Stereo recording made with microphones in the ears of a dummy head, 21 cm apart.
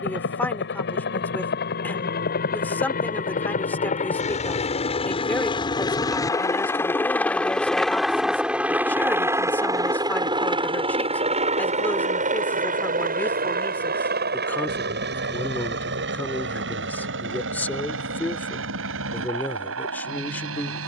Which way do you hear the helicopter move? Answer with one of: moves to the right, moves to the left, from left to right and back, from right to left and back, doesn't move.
moves to the right.